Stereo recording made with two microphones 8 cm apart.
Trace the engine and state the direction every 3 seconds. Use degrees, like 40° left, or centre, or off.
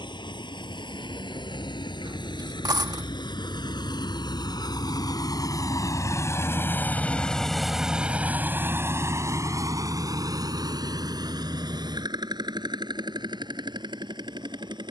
80° left, 60° left, centre, 50° right, 70° right.